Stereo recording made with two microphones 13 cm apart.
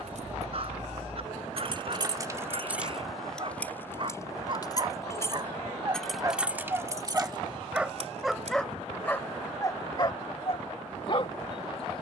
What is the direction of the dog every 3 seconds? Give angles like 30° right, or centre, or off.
50° right, 40° right, 10° right, 30° left.